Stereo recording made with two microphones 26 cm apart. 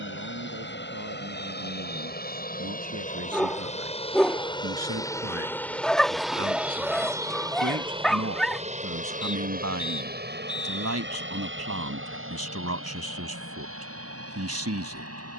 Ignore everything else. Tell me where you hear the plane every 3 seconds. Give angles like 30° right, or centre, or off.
40° left, 20° left, 10° right, 40° right, 50° right.